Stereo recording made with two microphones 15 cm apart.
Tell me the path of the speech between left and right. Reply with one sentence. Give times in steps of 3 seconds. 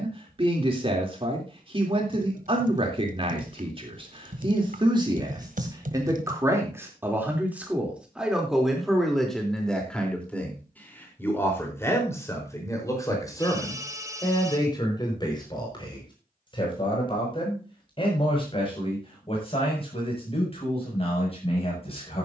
In this clip you hear the speech on the right from 0 s, in the centre from 6 s and on the left from 12 s.